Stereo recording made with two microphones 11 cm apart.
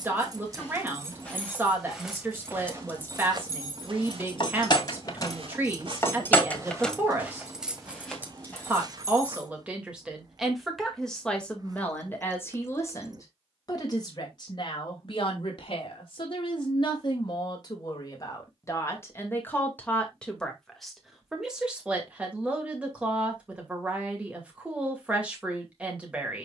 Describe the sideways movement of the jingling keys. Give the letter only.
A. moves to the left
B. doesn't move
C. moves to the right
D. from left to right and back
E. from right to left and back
E.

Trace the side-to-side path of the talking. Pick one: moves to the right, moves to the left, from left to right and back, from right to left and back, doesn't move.
from right to left and back.